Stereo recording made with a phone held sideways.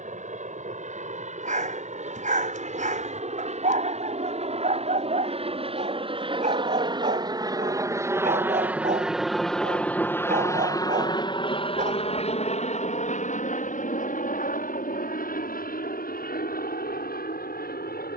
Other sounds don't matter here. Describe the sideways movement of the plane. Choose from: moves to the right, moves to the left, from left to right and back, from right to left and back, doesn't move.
moves to the left.